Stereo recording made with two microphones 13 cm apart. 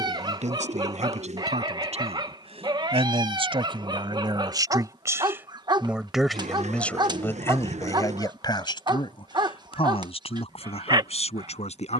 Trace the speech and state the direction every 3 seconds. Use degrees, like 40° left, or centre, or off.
60° right, 30° right, 20° left, 50° left.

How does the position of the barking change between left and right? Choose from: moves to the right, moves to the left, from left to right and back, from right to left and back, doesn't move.
doesn't move.